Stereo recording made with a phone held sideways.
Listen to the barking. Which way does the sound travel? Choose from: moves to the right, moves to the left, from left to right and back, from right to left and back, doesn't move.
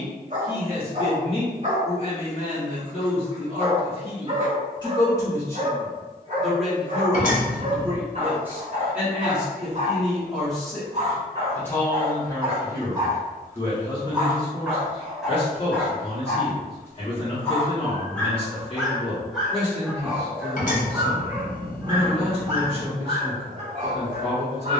from right to left and back.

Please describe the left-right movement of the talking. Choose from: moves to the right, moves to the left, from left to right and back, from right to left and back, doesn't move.
from left to right and back.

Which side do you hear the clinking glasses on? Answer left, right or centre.
left.